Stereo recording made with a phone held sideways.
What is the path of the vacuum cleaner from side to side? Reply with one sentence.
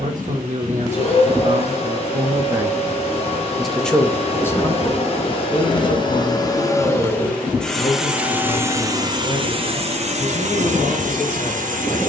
In this clip you hear the vacuum cleaner move to the right.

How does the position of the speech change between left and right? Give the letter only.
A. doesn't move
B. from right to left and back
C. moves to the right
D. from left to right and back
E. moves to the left
E.